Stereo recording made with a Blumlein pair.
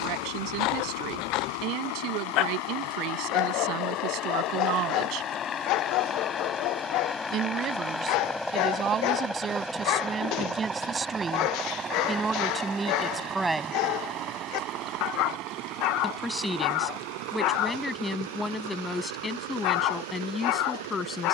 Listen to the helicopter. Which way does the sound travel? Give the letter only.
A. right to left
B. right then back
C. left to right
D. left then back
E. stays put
C.